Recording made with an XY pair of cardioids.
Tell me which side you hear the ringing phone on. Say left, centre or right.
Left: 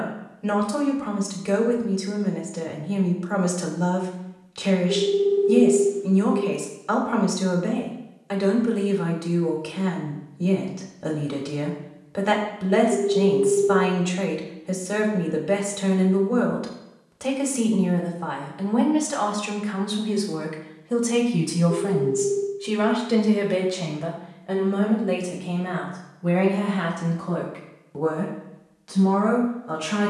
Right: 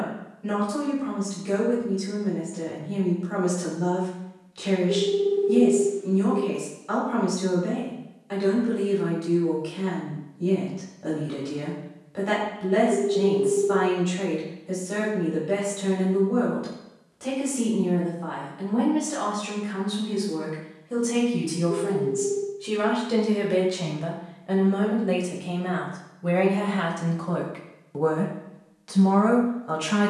centre.